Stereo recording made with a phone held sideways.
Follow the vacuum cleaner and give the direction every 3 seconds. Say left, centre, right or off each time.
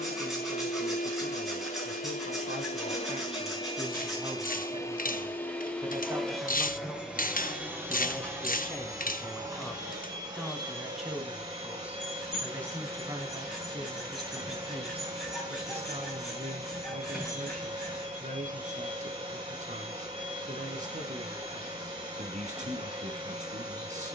left, left, centre, right, right, right, right, right.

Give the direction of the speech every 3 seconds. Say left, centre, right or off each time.
right, right, centre, centre, right, right, right, right.